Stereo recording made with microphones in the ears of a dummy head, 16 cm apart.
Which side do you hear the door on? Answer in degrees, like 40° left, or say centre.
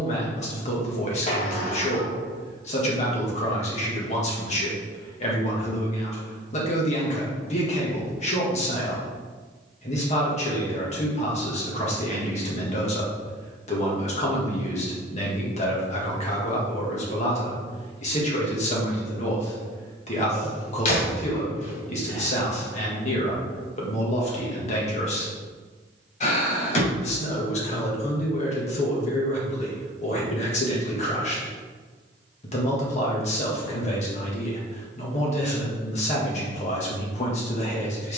40° left.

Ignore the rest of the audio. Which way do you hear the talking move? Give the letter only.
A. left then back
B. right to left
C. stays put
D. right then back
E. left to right
C.